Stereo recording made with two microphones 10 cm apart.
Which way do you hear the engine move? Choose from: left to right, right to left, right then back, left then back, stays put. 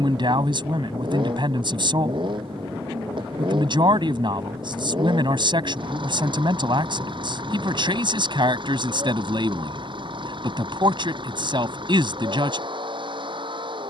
stays put.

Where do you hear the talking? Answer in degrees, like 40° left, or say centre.
50° right.